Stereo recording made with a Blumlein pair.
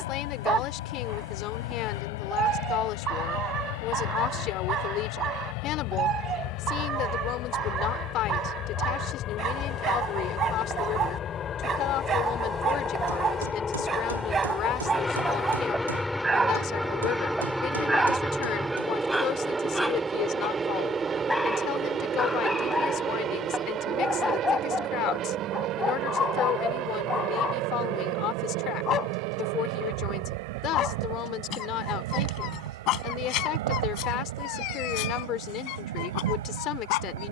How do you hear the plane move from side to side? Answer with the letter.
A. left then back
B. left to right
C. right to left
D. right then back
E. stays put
B.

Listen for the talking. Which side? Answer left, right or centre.
left.